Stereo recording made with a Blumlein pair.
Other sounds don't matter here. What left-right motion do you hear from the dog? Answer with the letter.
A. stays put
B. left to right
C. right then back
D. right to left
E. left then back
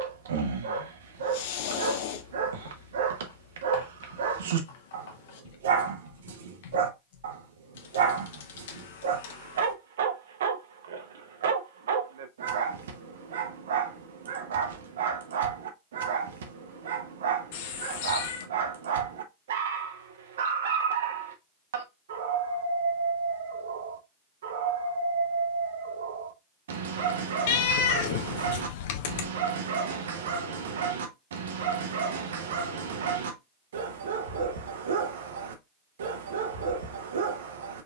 A.